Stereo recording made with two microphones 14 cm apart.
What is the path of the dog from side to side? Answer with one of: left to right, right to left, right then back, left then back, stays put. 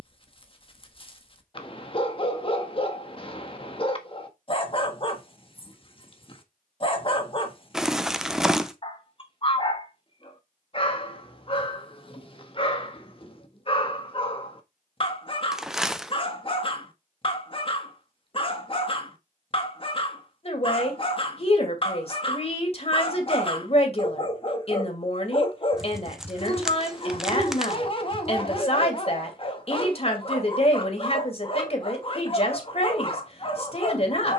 stays put.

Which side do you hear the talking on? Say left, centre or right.
left.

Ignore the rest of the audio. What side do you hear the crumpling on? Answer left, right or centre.
centre.